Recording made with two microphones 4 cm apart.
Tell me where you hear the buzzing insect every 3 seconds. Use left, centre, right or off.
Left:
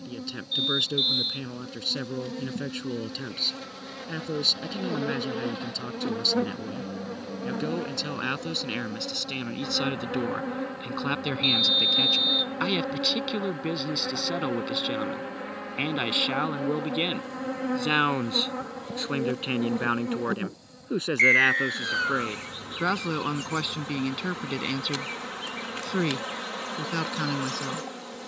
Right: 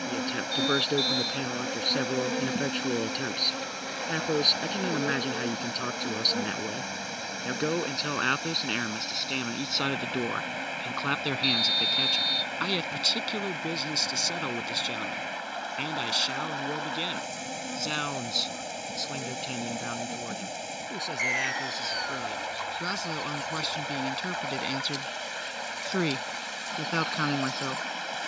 right, centre, left, left, left, left, left, left, left, left.